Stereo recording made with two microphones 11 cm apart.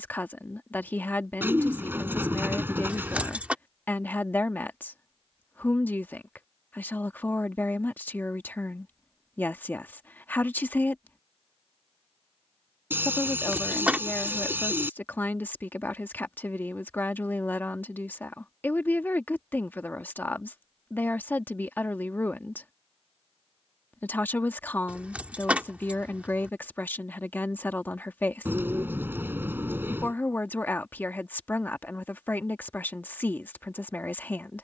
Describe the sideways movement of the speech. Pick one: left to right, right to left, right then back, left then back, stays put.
stays put.